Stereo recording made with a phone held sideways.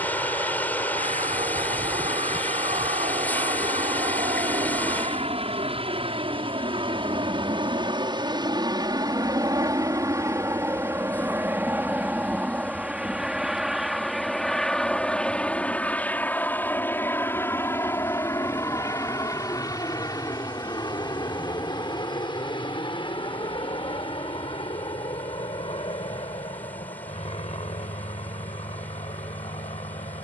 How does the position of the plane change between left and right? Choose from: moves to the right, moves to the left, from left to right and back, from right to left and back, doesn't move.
moves to the left.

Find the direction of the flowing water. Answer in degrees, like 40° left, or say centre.
10° left.